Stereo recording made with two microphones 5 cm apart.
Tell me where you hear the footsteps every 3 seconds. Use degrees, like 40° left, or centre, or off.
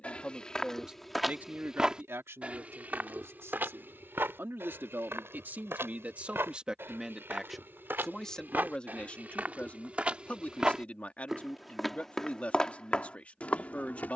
10° right, 50° right, 50° right, 20° right, 20° left.